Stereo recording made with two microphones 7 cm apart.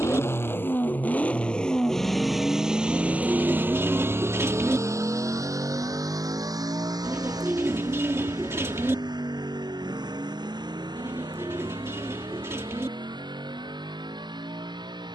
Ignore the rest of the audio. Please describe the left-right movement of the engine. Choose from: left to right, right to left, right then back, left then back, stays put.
left to right.